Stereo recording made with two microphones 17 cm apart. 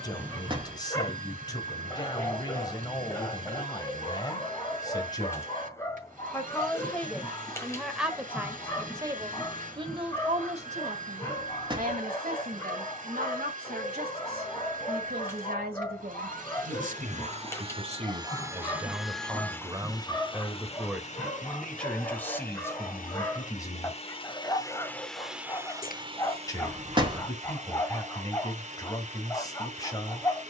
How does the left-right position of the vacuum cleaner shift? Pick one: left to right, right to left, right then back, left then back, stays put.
left then back.